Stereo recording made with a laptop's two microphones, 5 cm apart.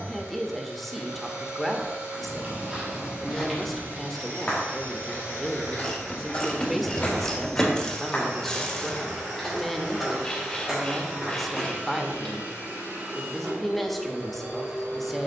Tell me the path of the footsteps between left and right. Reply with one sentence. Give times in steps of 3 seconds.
In this clip you hear the footsteps on the right from 0 s, on the left from 3 s, in the centre from 9 s and not at all from 12 s.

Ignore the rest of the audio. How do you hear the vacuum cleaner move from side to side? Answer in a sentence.
You can hear the vacuum cleaner stay put.